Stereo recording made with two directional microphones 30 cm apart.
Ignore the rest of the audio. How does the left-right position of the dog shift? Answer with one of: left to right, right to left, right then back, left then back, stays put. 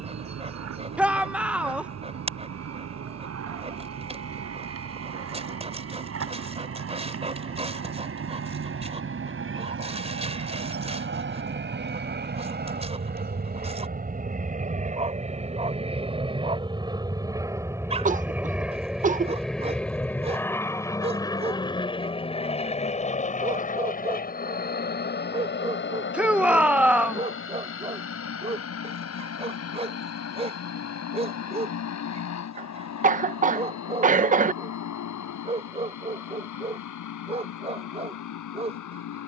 stays put.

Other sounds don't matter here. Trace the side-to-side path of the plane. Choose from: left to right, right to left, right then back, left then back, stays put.
right to left.